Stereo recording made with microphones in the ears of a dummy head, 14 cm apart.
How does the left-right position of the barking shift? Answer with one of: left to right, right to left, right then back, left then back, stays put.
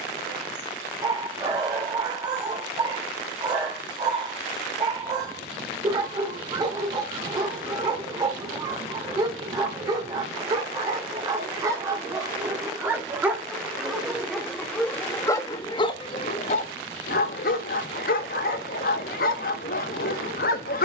right to left.